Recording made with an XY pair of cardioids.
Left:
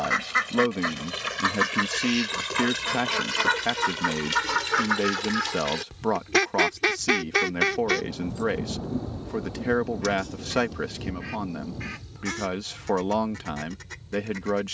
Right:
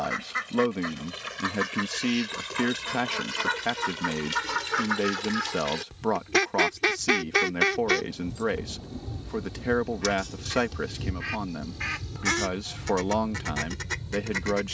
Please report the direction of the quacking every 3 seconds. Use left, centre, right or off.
left, left, centre, right, right.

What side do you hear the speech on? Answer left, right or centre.
centre.